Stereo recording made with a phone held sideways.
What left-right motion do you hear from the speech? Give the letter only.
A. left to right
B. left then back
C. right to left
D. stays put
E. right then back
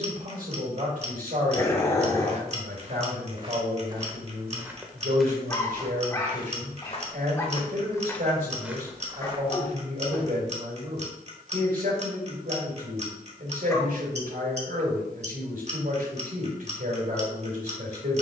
D.